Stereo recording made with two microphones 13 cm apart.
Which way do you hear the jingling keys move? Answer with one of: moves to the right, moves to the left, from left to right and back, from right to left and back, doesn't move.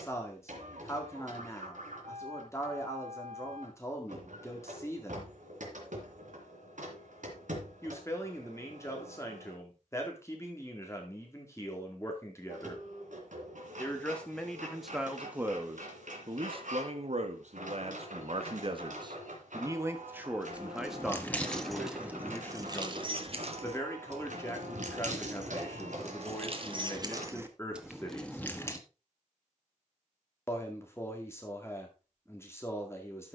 from left to right and back.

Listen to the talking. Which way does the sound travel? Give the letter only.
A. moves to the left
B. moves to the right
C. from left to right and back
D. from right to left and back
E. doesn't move
C.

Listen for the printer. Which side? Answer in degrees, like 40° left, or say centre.
80° right.